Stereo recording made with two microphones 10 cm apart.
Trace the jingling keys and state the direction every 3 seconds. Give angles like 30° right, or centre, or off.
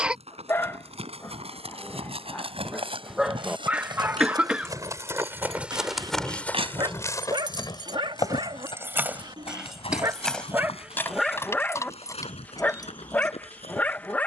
off, 80° right, 40° right, 10° left, 30° left.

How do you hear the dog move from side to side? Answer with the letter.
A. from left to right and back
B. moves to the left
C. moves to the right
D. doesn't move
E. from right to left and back
A.